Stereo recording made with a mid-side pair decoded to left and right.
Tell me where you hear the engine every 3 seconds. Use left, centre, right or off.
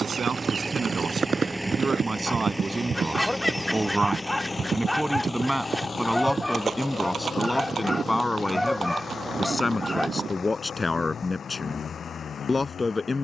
centre, left, left, left, left.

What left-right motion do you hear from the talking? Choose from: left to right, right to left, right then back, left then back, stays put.
right to left.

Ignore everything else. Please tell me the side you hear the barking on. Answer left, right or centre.
centre.